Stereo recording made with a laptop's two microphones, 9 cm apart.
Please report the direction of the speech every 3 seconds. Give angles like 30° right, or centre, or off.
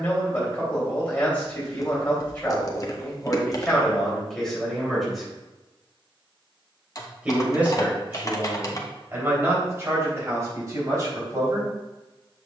20° left, 10° left, 20° right, 30° right.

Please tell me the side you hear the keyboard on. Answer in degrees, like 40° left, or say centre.
40° left.